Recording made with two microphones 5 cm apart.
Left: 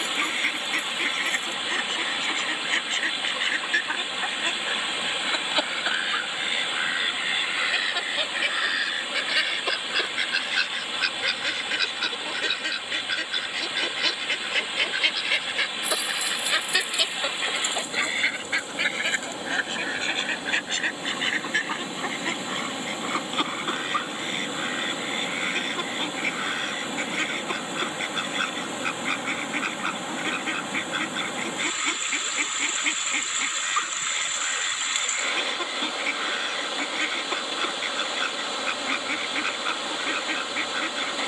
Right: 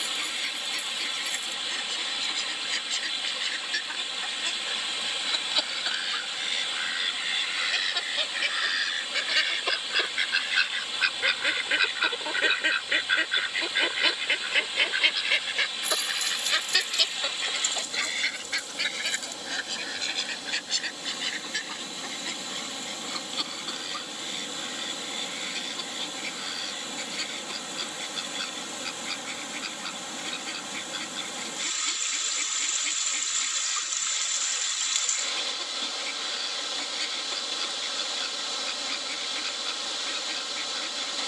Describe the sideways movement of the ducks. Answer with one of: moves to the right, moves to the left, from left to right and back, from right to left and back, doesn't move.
from left to right and back.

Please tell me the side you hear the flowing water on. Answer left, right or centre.
left.